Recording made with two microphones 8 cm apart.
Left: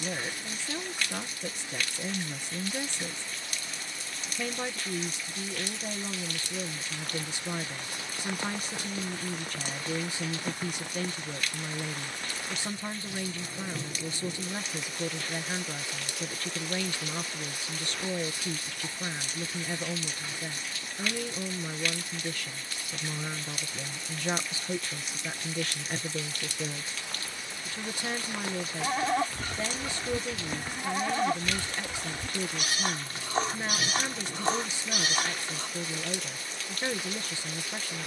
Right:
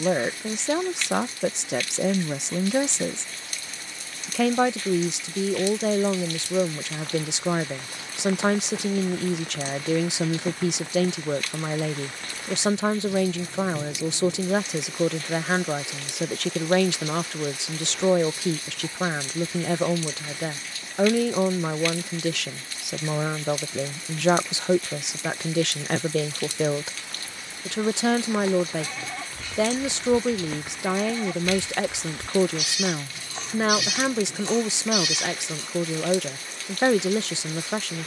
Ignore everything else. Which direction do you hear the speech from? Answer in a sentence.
In this clip you hear the speech on the right.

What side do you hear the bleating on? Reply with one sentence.
In this clip you hear the bleating on the left.